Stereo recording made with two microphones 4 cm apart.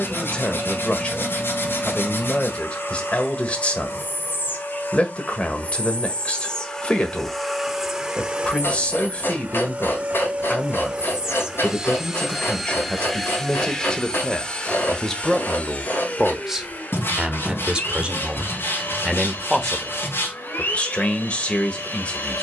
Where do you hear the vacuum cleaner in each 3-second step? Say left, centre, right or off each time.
left, left, centre, right, centre, left, left, left.